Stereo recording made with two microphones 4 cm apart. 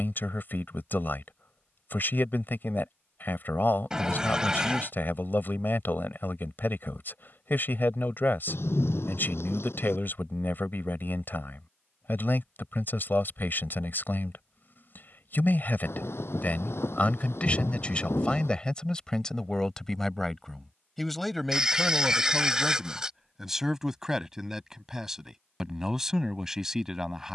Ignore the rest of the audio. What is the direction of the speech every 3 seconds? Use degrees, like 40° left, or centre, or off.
50° left, 50° left, 50° left, 50° left, 50° left, 40° left, 10° left, centre, 10° right.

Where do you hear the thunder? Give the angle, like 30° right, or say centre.
70° left.